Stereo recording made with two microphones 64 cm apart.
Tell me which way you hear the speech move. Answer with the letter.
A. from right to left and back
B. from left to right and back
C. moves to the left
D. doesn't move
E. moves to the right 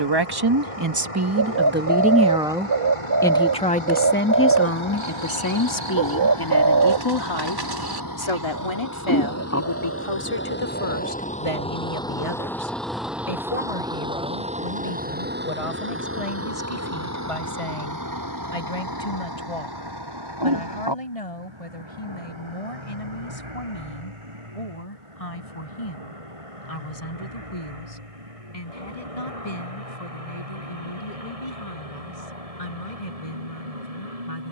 C.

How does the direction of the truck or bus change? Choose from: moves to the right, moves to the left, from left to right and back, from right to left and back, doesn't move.
moves to the right.